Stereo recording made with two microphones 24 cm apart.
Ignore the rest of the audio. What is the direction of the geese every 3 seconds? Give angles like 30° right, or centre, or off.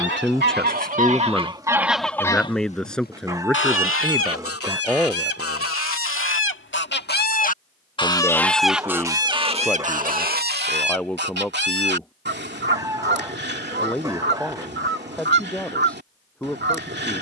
20° right, 60° left, 30° left, 40° right, 50° right, 50° right.